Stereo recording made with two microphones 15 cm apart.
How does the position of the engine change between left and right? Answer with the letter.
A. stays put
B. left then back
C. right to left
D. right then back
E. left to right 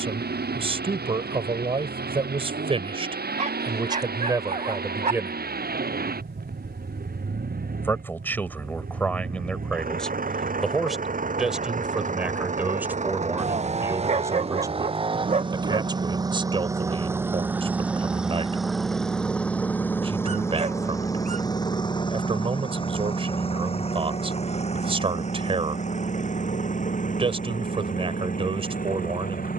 C.